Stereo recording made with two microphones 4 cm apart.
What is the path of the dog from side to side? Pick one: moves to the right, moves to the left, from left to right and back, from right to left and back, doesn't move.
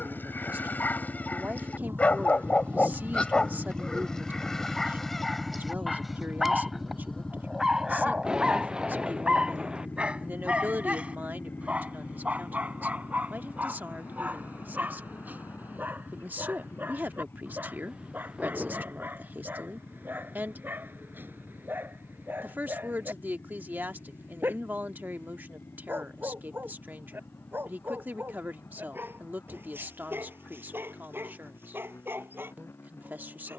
moves to the right.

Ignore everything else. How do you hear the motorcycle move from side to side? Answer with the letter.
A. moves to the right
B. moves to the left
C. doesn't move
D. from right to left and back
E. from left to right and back
B.